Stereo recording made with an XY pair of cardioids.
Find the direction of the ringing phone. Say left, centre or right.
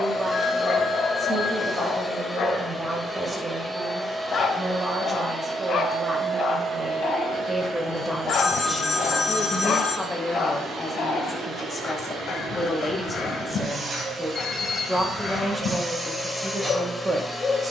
left.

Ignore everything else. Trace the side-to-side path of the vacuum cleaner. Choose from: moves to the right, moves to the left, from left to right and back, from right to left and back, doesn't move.
from left to right and back.